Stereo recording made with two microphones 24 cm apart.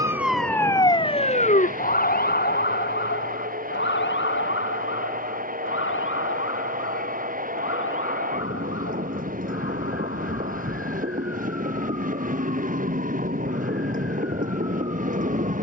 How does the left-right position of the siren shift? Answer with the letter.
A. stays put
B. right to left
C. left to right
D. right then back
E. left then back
B.